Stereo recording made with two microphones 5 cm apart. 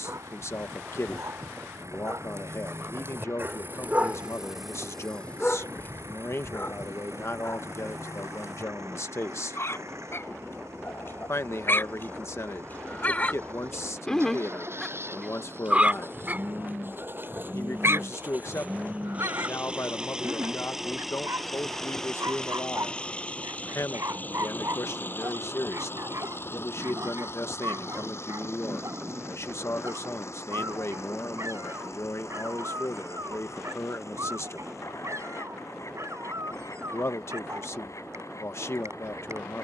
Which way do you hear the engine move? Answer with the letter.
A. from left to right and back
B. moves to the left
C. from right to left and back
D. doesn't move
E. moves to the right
B.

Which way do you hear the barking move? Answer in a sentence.
In this clip you hear the barking go left and come back.